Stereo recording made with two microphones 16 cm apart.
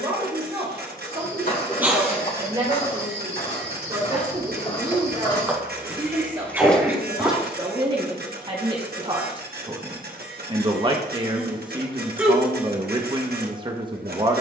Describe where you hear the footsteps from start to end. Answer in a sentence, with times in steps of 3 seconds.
You can hear the footsteps on the left from 0 s, in the centre from 6 s and not at all from 9 s.